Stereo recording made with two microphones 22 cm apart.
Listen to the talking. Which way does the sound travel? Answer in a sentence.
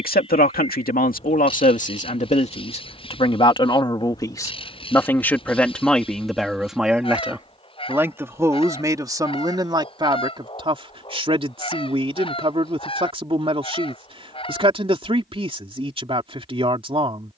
In this clip you hear the talking move to the right.